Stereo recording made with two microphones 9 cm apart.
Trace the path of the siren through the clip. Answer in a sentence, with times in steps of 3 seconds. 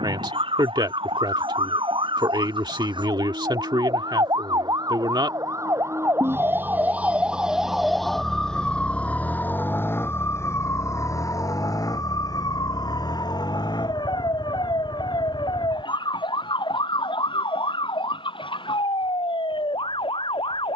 You can hear the siren on the right from 0 s, in the centre from 6 s and on the left from 9 s.